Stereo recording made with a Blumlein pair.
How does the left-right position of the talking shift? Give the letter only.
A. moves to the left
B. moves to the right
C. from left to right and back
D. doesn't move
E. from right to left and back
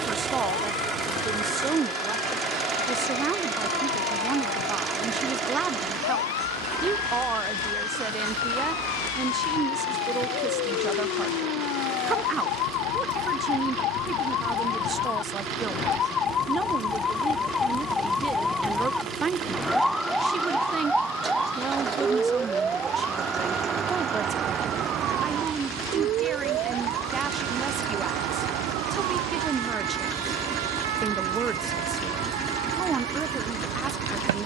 D.